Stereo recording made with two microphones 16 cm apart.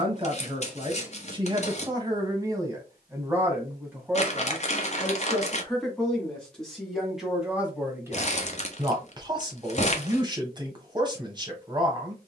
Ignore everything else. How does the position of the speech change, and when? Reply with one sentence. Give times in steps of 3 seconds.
In this clip you hear the speech on the right from 0 s, in the centre from 3 s and on the right from 9 s.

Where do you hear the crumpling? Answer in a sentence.
In this clip you hear the crumpling on the left.